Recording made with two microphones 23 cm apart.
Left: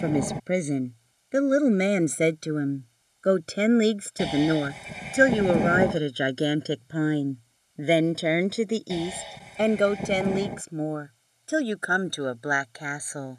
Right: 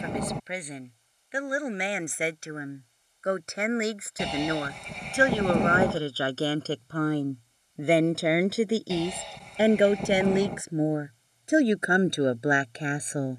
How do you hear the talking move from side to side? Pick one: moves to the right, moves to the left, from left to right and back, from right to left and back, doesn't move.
moves to the right.